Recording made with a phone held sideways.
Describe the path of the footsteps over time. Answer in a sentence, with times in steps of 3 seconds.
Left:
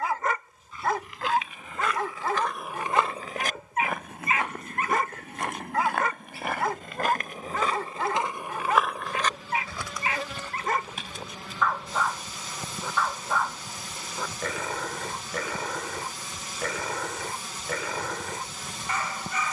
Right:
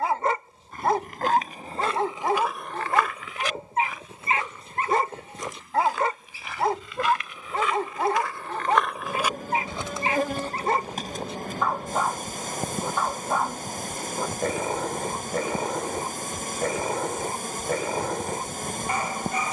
In this clip you hear the footsteps on the right from 0 s, on the left from 3 s, on the right from 9 s and not at all from 12 s.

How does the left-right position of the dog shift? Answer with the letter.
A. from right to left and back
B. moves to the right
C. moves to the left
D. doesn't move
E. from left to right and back
D.